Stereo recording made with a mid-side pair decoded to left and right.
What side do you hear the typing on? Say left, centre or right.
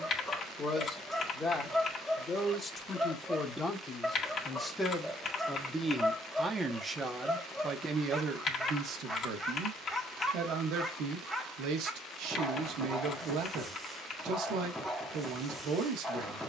left.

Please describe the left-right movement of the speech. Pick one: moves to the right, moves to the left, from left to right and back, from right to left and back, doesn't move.
moves to the right.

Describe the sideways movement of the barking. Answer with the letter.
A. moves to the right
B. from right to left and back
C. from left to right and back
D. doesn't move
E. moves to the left
D.